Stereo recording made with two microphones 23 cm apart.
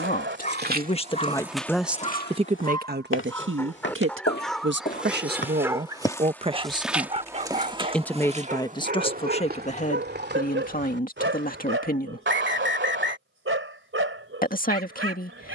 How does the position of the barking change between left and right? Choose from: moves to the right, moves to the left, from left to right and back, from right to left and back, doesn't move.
moves to the right.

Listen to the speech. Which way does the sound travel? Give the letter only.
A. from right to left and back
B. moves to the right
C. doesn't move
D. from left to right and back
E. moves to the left
D.